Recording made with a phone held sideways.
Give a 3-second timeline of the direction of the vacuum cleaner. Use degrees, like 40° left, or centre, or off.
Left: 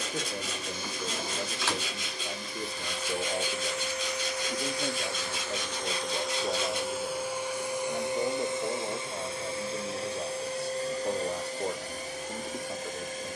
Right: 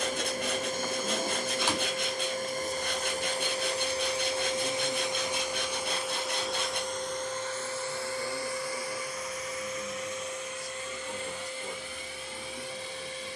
50° right, 30° right, 10° left, 30° left, 40° left.